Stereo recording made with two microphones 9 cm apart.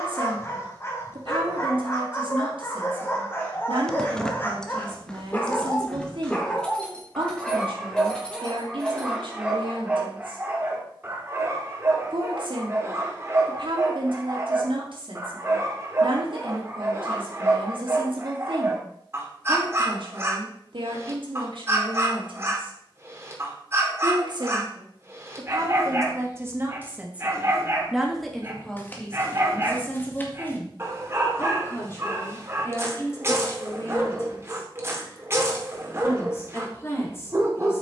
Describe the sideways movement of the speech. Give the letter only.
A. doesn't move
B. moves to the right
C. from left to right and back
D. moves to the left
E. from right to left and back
D.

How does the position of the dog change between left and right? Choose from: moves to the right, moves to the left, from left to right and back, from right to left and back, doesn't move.
moves to the right.